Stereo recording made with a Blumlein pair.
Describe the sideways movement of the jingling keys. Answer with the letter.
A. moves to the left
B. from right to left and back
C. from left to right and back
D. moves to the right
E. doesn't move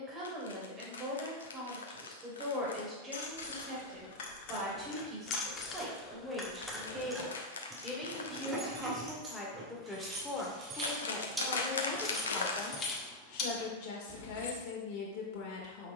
C.